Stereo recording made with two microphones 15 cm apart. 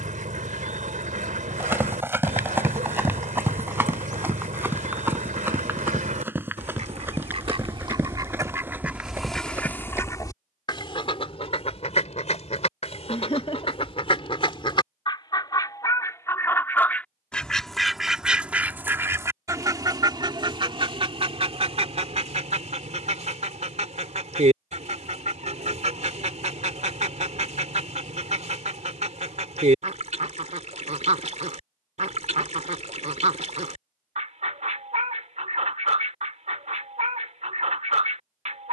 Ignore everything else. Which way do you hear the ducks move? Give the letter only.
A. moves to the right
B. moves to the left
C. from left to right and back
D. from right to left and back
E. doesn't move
D.